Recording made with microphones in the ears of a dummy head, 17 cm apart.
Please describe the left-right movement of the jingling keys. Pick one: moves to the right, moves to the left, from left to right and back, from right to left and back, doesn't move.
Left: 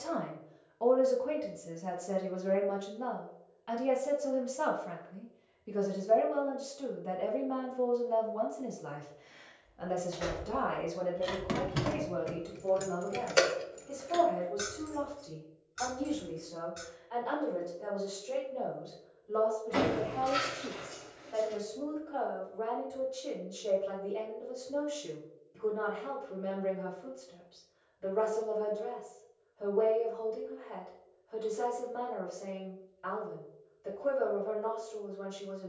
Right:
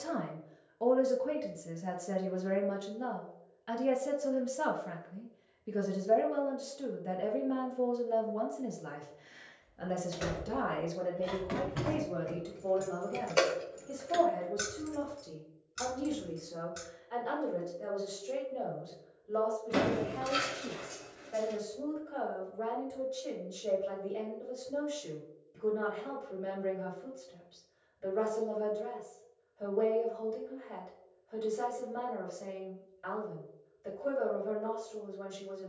moves to the right.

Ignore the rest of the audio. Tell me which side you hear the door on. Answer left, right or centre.
right.